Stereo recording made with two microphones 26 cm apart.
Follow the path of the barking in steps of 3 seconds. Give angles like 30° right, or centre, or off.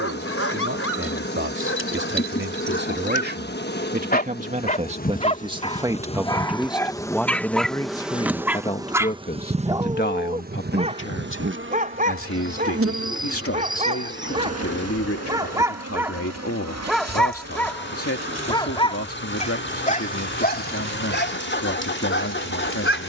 50° left, 30° left, centre, 20° right, 30° right, centre, 30° left, 40° left.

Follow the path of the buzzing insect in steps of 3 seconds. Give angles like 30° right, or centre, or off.
40° left, 30° left, centre, 30° right, 60° right, 70° right, 80° right, 80° right.